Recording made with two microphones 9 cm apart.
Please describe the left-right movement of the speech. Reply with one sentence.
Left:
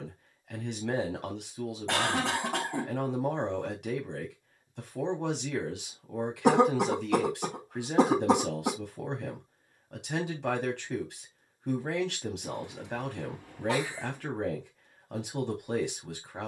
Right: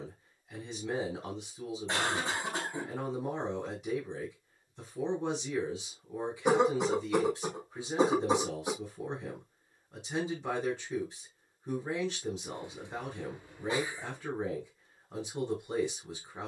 You can hear the speech stay put.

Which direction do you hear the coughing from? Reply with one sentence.
You can hear the coughing on the left.